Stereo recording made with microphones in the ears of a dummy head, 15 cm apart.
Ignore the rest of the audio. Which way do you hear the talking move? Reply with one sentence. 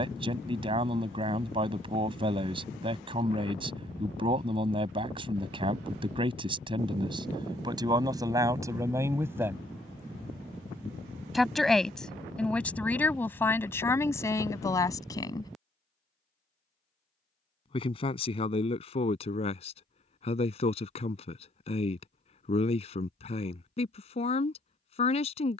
In this clip you hear the talking travel towards the left.